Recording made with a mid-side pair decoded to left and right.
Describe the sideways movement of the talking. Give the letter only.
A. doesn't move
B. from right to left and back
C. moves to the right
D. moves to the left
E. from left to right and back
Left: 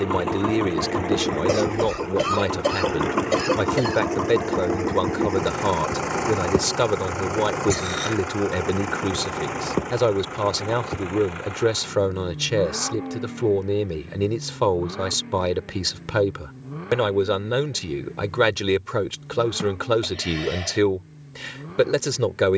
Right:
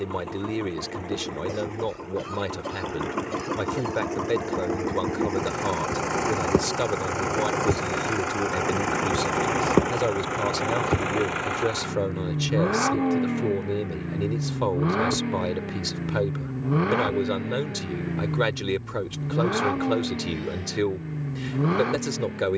A.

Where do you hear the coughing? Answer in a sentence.
In this clip you hear the coughing on the left.